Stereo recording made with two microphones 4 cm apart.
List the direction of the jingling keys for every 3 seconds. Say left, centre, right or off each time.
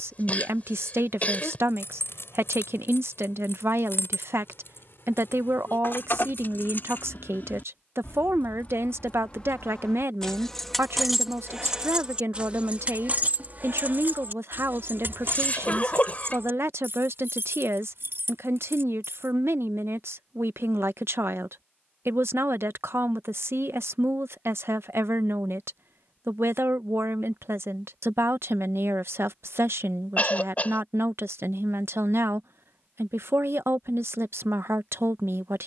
left, left, left, centre, right, right, right, off, off, off, off, off.